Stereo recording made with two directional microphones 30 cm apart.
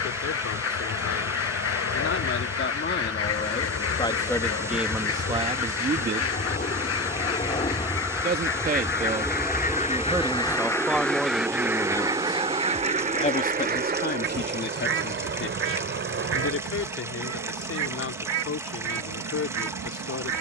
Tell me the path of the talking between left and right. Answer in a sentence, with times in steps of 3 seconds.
In this clip you hear the talking on the left from 0 s, in the centre from 3 s, on the right from 6 s, in the centre from 9 s and on the left from 12 s.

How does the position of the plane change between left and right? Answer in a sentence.
You can hear the plane move to the right.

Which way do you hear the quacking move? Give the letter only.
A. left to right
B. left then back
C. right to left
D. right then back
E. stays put
A.